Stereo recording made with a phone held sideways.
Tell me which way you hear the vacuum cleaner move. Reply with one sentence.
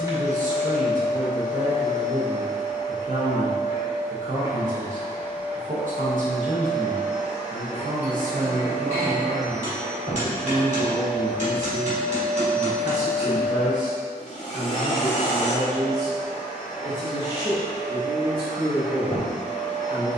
You can hear the vacuum cleaner travel towards the left.